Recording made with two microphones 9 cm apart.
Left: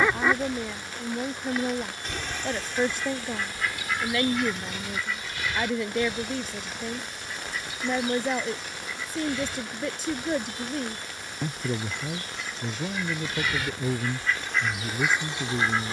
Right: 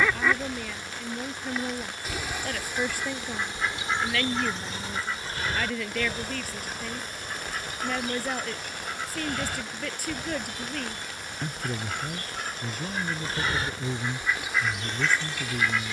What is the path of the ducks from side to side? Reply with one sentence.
You can hear the ducks move from left to right and back again.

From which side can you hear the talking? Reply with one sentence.
You can hear the talking on the left.